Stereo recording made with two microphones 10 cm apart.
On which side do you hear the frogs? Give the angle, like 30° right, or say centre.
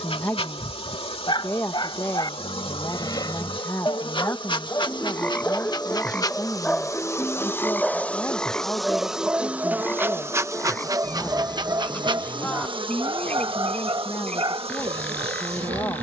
10° left.